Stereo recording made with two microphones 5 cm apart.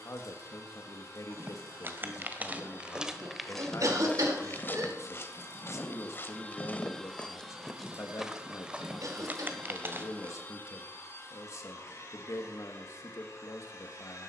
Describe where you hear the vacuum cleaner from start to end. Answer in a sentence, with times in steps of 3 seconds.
You can hear the vacuum cleaner on the left from 0 s, in the centre from 6 s and on the left from 9 s.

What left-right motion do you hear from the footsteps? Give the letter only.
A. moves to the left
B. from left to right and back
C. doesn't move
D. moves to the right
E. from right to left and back
E.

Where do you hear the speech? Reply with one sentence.
In this clip you hear the speech on the left.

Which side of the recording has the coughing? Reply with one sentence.
In this clip you hear the coughing on the right.